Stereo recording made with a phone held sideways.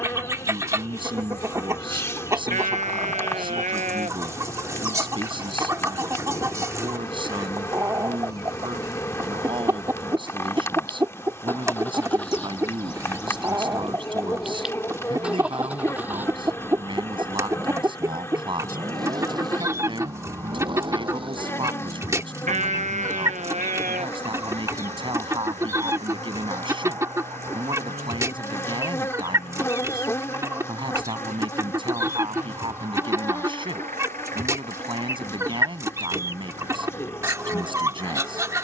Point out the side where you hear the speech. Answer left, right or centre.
right.